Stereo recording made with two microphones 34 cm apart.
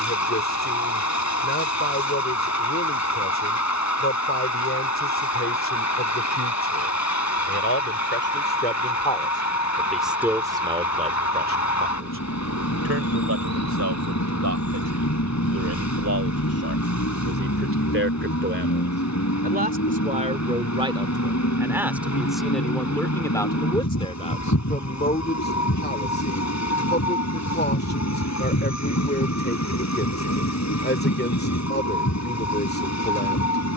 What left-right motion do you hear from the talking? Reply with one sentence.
In this clip you hear the talking move from left to right and back again.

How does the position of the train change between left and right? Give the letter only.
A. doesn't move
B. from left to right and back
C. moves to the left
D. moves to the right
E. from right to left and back
A.